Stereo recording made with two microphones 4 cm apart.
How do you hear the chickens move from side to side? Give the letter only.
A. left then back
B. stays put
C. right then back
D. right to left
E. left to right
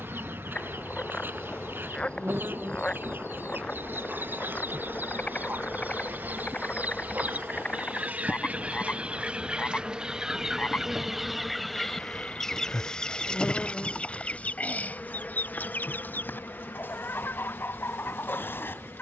D.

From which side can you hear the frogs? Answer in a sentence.
You can hear the frogs on the left.